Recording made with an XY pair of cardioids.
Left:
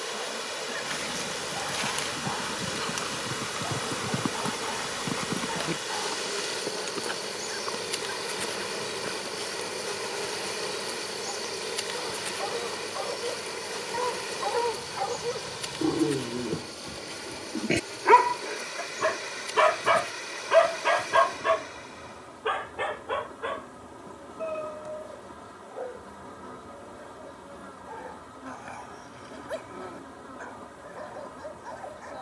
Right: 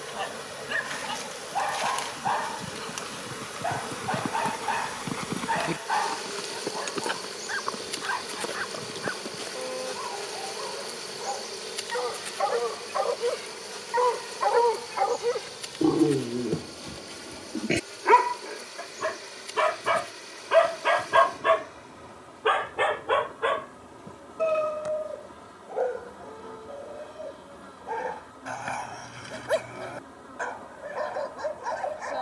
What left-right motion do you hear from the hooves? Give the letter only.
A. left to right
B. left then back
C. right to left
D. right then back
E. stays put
A.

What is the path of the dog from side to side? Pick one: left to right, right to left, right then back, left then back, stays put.
left then back.